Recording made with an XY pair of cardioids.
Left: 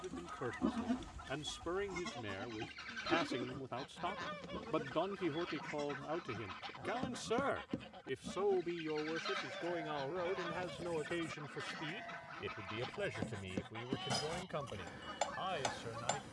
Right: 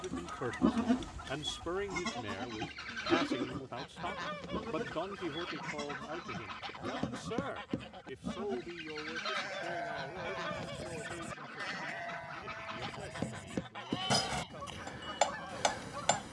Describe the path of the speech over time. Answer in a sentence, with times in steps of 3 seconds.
You can hear the speech on the right from 0 s, in the centre from 3 s and on the left from 6 s.